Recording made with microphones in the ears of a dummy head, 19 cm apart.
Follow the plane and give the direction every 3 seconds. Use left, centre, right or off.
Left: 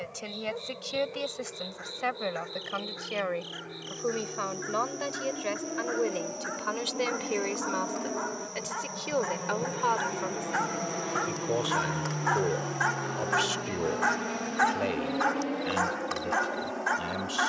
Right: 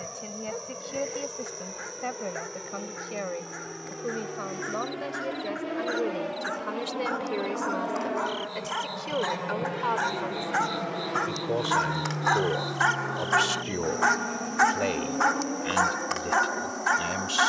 right, right, right, centre, left, left.